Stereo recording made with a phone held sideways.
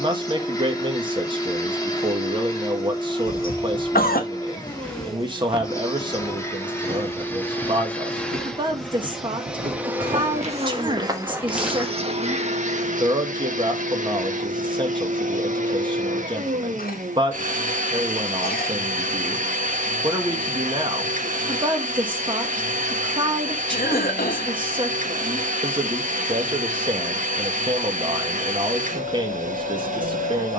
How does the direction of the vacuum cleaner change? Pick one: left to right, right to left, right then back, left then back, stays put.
left to right.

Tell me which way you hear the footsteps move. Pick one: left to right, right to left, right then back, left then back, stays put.
right then back.